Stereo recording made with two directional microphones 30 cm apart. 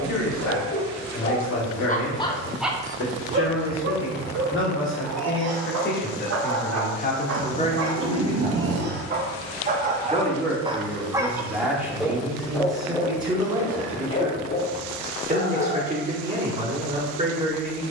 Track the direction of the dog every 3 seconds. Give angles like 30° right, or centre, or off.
30° left, 50° right, 40° right, 20° right, 20° left, 40° left.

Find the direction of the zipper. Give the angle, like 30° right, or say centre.
50° right.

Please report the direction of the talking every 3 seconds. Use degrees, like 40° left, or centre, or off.
60° left, 50° left, 30° left, centre, 10° right, 20° right.